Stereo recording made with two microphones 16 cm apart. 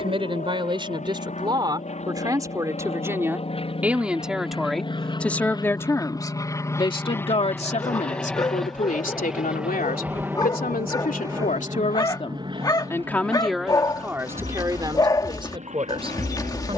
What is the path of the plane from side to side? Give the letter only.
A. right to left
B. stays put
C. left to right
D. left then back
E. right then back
C.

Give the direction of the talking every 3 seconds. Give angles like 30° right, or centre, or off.
30° right, centre, 40° left, 60° left, centre, 30° right.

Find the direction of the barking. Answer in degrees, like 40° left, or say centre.
20° left.